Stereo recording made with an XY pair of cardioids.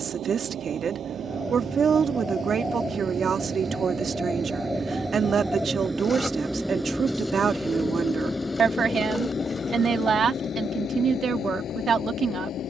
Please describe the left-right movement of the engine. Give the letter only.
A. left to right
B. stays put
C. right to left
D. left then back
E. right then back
C.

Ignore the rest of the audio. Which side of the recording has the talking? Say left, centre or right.
right.